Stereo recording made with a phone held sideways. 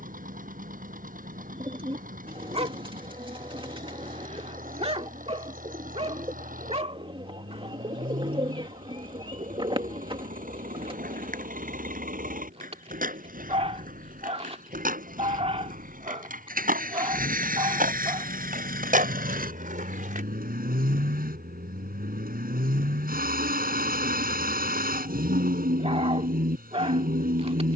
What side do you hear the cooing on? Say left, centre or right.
right.